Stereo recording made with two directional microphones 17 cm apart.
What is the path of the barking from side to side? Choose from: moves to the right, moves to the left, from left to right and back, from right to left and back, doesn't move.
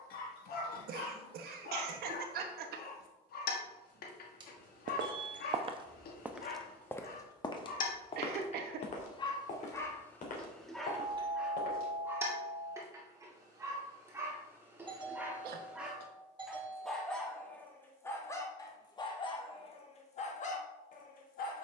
from left to right and back.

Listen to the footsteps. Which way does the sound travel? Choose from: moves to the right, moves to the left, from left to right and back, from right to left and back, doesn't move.
moves to the left.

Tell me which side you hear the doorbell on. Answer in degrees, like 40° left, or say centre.
30° right.